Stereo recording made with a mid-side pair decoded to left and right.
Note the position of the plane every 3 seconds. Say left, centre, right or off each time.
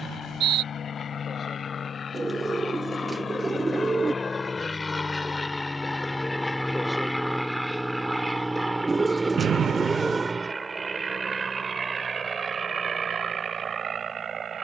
left, left, centre, right, right.